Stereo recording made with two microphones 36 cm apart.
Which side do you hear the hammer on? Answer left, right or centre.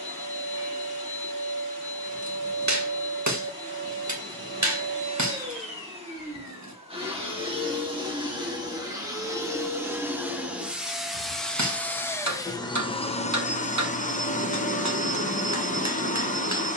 right.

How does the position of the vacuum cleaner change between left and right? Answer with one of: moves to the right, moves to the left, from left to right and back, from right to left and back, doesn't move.
moves to the left.